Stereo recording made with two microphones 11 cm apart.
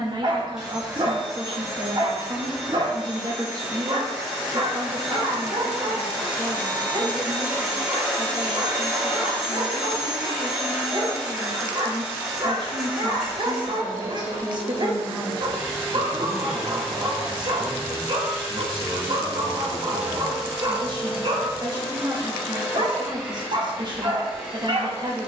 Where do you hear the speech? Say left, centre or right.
right.